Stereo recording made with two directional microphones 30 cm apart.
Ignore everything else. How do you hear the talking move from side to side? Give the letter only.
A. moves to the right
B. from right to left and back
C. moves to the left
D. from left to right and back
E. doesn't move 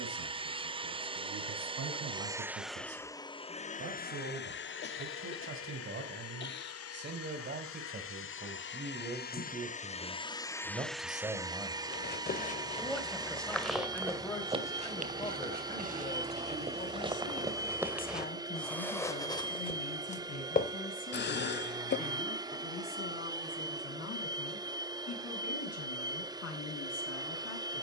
C.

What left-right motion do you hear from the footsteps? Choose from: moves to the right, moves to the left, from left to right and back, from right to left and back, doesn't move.
from left to right and back.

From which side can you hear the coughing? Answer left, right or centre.
left.